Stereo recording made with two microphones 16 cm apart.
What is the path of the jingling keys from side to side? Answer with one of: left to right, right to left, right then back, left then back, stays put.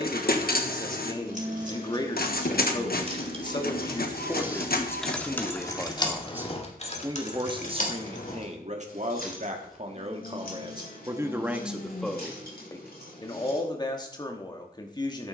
right to left.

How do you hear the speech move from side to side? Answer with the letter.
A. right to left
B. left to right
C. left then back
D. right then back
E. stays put
D.